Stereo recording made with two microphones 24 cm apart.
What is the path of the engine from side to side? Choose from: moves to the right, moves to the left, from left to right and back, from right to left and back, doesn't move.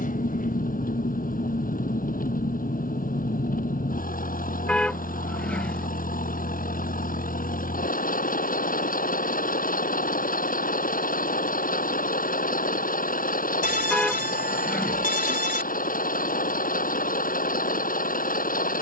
doesn't move.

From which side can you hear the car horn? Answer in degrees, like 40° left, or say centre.
centre.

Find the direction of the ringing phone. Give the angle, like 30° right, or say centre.
40° left.